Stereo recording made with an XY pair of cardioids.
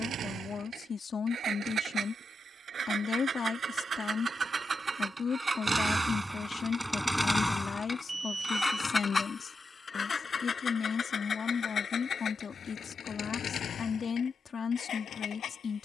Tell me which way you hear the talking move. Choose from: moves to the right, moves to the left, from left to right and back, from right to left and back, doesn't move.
doesn't move.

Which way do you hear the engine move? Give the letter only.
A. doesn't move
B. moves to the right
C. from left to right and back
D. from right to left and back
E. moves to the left
E.